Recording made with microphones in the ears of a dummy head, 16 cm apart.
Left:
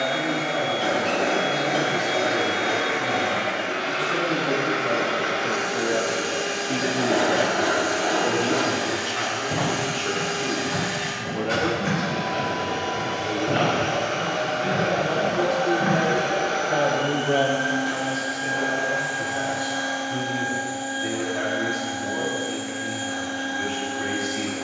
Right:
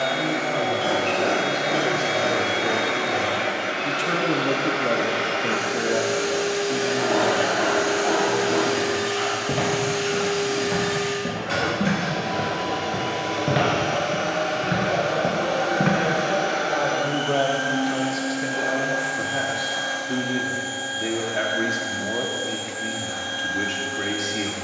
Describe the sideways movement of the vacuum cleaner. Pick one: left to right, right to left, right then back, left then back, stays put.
stays put.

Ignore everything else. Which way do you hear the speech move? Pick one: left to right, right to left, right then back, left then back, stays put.
left then back.